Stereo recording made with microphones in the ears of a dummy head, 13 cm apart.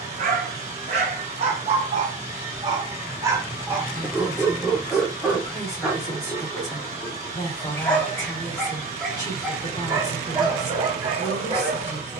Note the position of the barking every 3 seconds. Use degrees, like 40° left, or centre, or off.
40° right, 10° right, 10° left, 30° right.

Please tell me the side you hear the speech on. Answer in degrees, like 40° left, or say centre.
20° left.